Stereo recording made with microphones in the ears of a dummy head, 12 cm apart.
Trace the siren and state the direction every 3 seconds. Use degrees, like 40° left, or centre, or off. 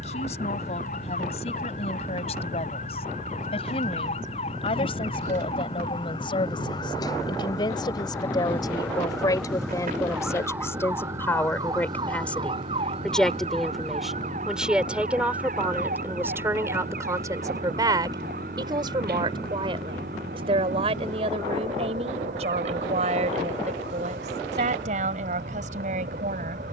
60° left, 50° left, 20° left, 10° right, 40° right, 60° right, 70° right, 80° right, 80° right.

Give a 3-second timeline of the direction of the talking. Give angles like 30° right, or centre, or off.
50° left, 40° left, 40° left, 20° left, centre, 20° right, 40° right, 50° right, 60° right.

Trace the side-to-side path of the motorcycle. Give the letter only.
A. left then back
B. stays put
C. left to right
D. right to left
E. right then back
B.